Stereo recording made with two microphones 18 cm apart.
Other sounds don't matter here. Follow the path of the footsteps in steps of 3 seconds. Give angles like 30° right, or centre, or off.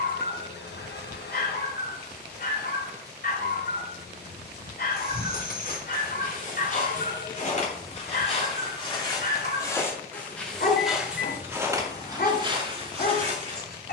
off, 50° left, 40° left, centre, 30° right.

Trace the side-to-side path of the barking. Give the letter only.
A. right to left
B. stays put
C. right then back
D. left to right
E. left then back
B.